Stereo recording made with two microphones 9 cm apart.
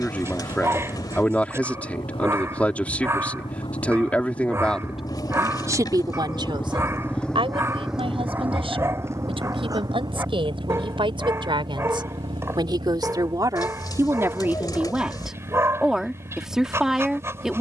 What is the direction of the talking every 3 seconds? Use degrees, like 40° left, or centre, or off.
20° left, centre, 70° right, 70° right, 30° right, 10° right.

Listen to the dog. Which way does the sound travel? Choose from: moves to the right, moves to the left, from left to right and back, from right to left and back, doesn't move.
doesn't move.